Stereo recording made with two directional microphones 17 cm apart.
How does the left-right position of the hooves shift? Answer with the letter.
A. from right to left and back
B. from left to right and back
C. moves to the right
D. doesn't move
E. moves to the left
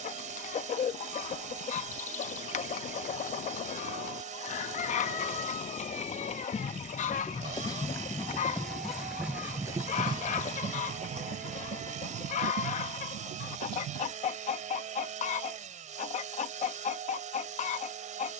C.